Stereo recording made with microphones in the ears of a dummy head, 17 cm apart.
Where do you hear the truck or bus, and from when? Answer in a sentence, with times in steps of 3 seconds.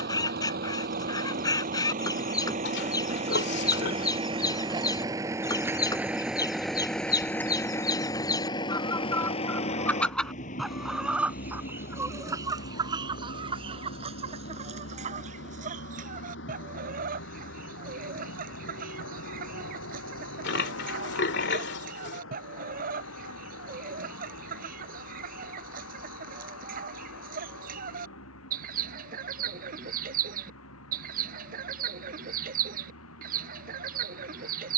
In this clip you hear the truck or bus on the right from 0 s, in the centre from 6 s and on the left from 9 s.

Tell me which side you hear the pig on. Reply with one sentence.
In this clip you hear the pig on the left.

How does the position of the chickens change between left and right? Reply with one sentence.
In this clip you hear the chickens move from left to right.